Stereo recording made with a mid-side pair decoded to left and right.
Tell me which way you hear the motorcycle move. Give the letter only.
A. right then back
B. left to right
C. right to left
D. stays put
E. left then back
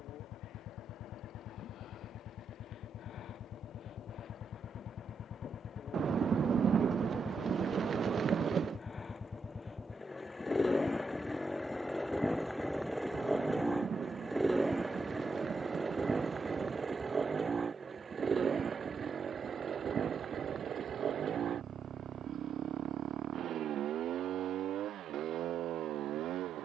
B.